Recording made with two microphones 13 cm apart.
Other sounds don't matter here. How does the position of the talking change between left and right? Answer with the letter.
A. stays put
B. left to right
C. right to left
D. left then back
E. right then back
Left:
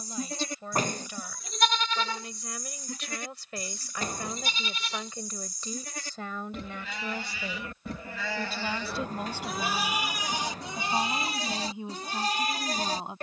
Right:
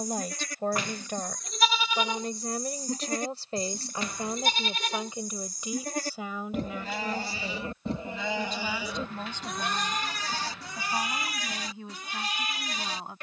C.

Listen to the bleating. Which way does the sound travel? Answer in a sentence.
You can hear the bleating move from left to right and back again.